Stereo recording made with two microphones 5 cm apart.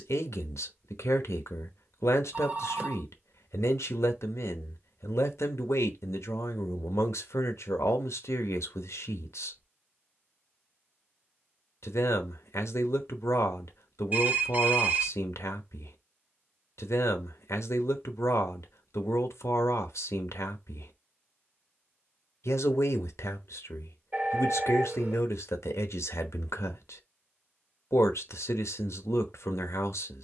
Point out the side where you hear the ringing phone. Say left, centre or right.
right.